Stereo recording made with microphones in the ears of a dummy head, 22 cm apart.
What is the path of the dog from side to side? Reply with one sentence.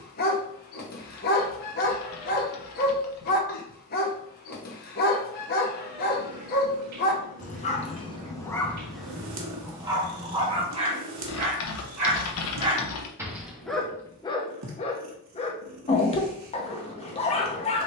In this clip you hear the dog move from left to right and back again.